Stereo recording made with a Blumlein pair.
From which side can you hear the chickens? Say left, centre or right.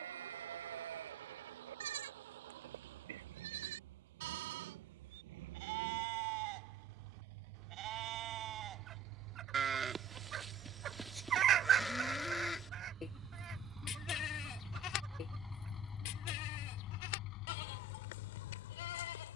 right.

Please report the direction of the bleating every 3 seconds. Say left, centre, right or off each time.
right, right, right, centre, left, left, left.